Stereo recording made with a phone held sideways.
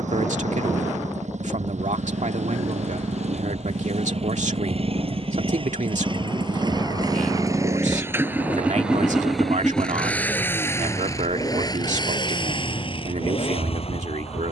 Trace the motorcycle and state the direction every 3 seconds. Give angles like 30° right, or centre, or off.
60° right, 50° right, 20° right, 10° left, 40° left.